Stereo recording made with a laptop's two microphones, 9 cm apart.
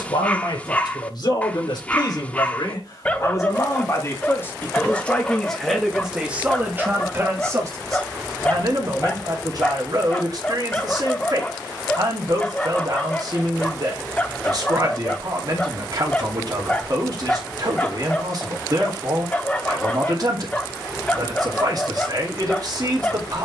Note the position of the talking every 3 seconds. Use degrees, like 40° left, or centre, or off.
60° left, 20° left, 30° right, 50° right, 50° right, 50° right, 50° right, 50° right.